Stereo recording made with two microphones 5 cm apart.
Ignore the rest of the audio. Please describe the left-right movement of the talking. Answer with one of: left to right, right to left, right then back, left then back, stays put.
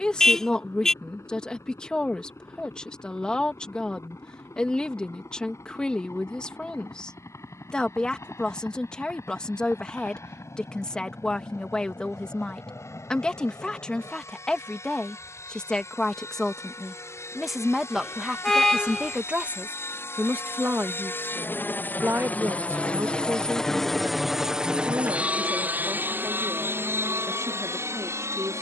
left to right.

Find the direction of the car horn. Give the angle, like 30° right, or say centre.
10° left.